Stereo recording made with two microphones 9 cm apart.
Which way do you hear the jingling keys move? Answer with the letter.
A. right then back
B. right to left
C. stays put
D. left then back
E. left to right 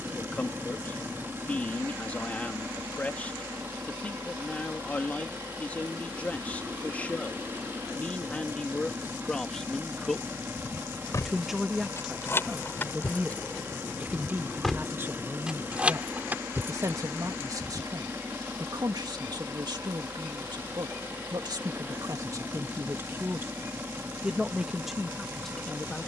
E.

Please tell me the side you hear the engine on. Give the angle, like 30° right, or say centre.
30° right.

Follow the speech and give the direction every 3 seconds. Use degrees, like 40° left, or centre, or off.
20° left, 20° left, 20° left, centre, 20° right, 40° right, 50° right, 40° right, centre.